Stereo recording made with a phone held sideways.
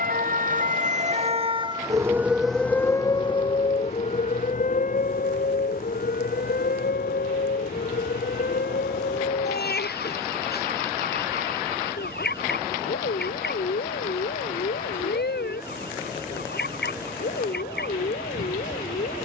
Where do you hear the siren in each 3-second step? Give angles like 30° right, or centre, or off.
30° right, 50° left, 70° left, 70° left, 80° left, 80° left, 80° left.